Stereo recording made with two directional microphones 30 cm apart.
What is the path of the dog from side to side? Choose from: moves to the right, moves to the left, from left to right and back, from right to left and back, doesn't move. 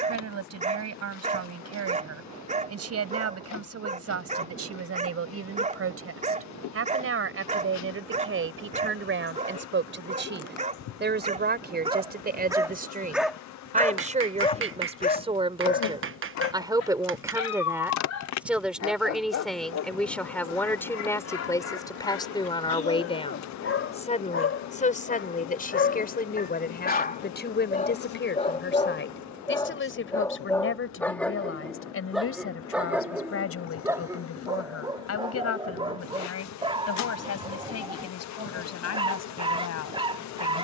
from right to left and back.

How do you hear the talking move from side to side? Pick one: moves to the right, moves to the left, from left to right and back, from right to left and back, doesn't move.
moves to the left.